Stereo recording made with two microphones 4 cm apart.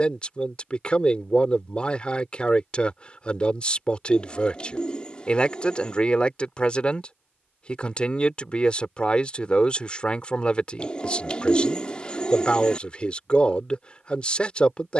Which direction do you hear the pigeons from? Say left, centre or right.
left.